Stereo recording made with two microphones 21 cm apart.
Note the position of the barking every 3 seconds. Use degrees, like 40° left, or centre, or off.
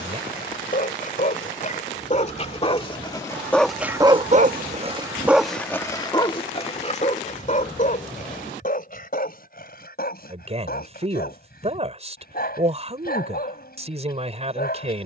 40° left, 10° right, 40° left, 50° left, 50° left.